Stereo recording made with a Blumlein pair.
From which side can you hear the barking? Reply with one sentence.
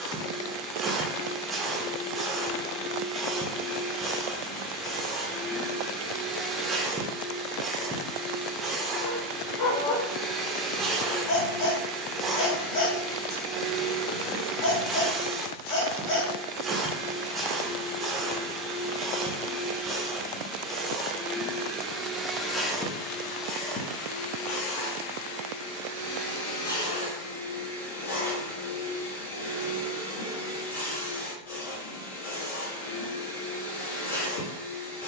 In this clip you hear the barking on the left.